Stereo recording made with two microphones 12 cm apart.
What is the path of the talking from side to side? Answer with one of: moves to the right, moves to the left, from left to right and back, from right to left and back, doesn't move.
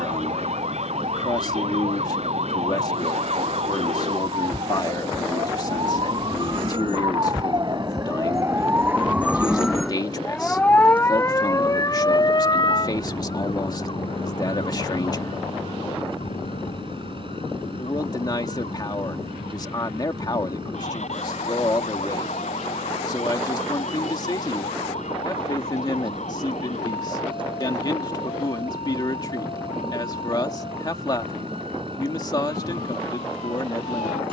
doesn't move.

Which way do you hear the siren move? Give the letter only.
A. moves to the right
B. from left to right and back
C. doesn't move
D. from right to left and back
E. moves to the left
E.